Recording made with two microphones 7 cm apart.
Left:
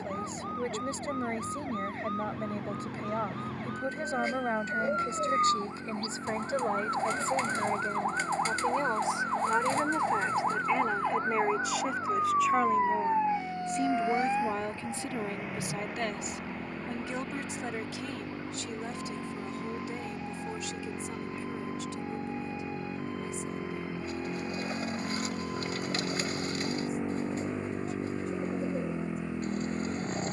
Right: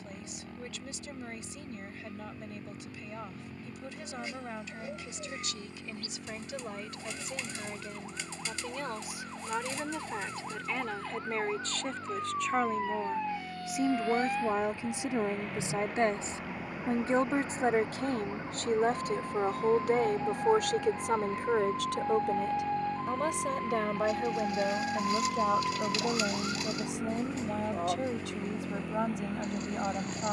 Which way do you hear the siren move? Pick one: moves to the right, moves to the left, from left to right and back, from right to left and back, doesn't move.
moves to the right.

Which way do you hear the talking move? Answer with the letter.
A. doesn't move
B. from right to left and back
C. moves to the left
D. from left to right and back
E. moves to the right
E.